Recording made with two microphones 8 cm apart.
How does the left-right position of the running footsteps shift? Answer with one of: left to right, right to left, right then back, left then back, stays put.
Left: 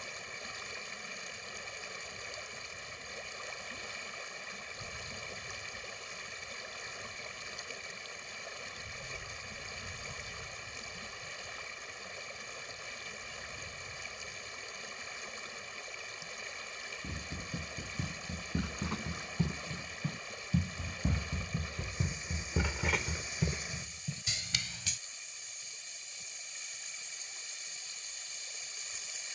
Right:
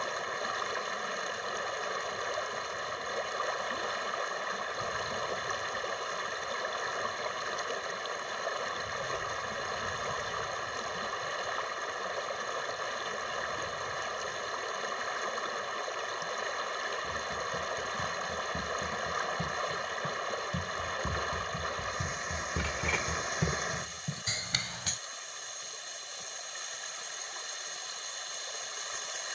left to right.